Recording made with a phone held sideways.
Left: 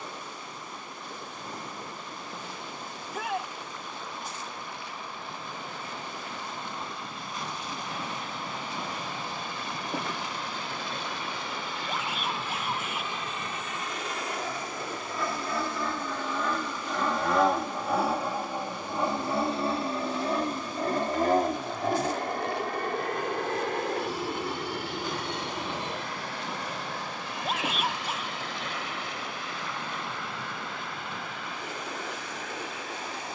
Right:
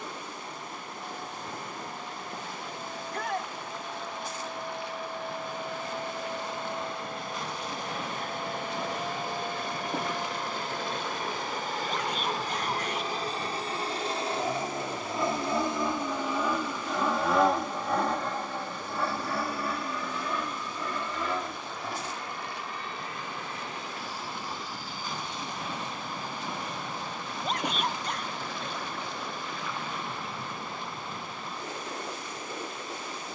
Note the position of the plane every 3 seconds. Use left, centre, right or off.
right, right, right, right, right, centre, left, left, left, left, left.